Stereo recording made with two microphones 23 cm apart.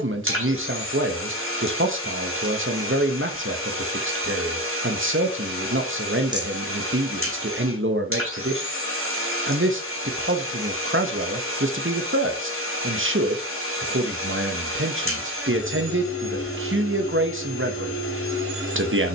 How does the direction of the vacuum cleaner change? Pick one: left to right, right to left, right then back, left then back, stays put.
stays put.